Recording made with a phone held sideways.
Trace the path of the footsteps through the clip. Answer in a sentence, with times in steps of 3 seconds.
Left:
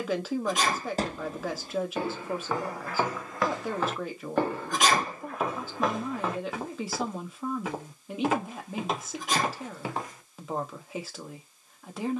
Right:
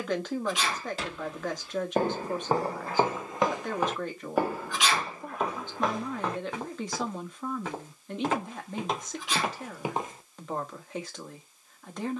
You can hear the footsteps on the right from 0 s and in the centre from 3 s.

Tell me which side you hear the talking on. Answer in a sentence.
In this clip you hear the talking in the centre.